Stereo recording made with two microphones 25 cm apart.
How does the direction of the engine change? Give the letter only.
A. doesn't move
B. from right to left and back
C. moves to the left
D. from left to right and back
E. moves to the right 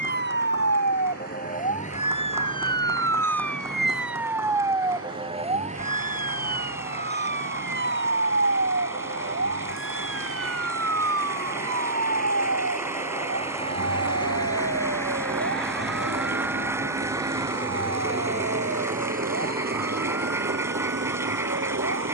E.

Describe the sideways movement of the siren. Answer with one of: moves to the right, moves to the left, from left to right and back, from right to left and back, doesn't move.
moves to the right.